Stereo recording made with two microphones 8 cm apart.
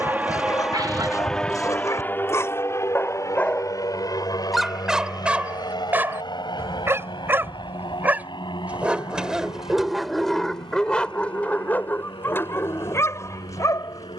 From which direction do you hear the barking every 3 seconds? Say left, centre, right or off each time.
left, centre, right, centre, left.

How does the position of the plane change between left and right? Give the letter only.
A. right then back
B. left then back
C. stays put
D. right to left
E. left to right
D.